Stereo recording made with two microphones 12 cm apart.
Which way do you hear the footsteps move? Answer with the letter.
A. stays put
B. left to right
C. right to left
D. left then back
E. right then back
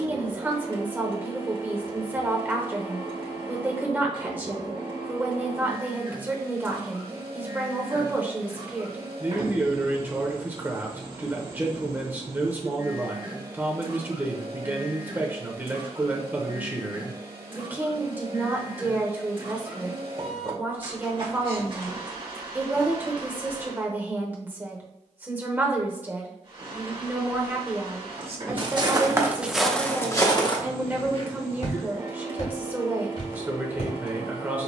C.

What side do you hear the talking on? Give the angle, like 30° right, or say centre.
10° right.